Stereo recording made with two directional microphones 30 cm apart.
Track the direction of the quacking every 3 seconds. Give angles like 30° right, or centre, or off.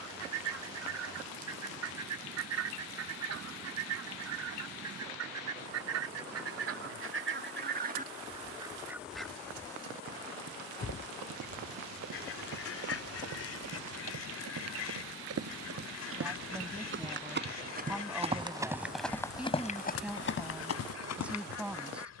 60° right, 60° right, 30° right, 10° left, 50° left, 60° left, 60° left, 60° left.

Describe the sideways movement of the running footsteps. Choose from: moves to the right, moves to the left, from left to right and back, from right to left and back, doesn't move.
moves to the left.